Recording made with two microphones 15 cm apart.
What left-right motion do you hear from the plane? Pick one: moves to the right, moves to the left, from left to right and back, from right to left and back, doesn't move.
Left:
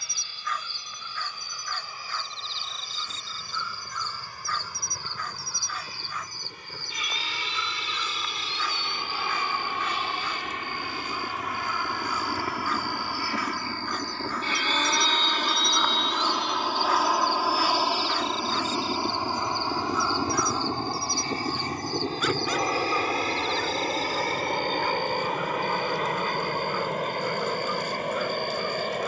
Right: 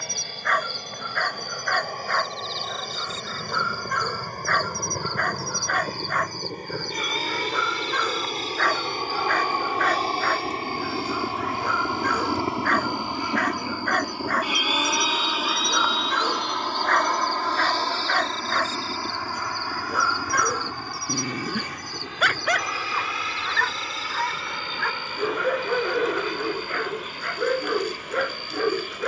moves to the left.